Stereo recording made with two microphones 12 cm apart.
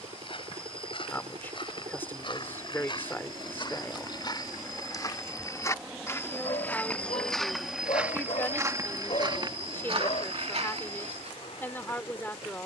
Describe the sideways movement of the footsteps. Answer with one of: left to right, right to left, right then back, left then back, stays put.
left to right.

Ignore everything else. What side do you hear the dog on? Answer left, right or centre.
left.